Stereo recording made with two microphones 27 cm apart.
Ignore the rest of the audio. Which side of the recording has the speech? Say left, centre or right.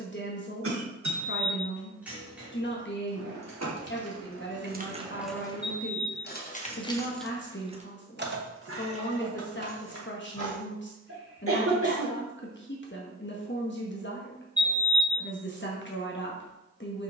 left.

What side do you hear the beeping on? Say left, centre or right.
centre.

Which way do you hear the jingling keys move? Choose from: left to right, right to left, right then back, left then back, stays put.
left then back.